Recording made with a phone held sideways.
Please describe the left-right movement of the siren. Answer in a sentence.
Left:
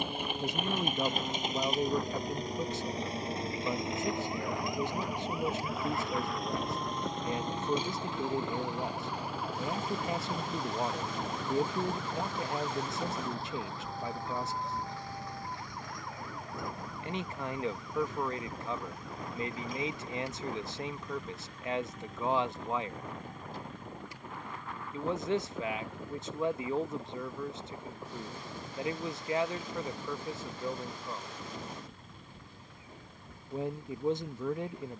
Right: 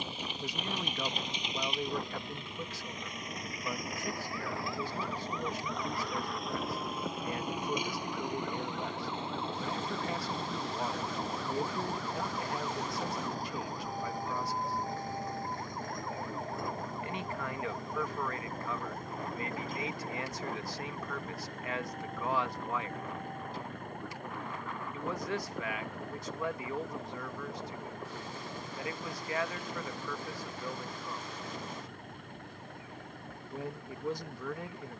In this clip you hear the siren move from left to right.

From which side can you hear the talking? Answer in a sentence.
You can hear the talking on the left.